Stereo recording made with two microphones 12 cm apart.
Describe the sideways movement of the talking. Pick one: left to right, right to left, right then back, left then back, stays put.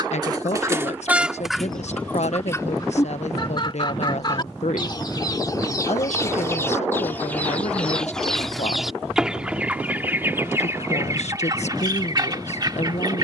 stays put.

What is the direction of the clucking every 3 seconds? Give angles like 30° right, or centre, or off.
centre, 40° left, 10° left, 20° right, 30° right.